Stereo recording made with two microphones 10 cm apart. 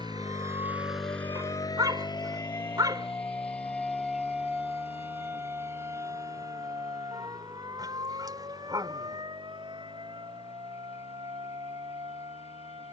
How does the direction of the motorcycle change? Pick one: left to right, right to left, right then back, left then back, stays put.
right to left.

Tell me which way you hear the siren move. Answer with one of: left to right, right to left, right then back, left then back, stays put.
left to right.